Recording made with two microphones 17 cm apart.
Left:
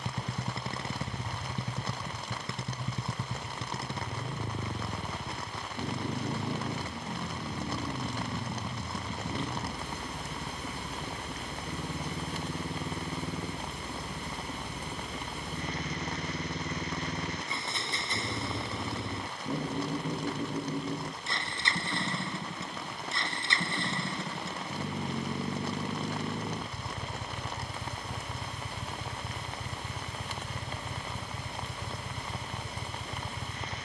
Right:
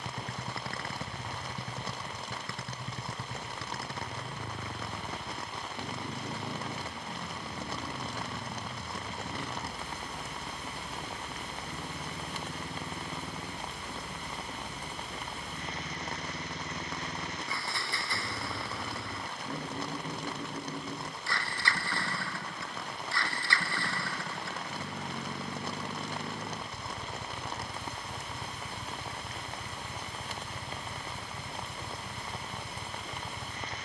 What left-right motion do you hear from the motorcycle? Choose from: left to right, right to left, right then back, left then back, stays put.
stays put.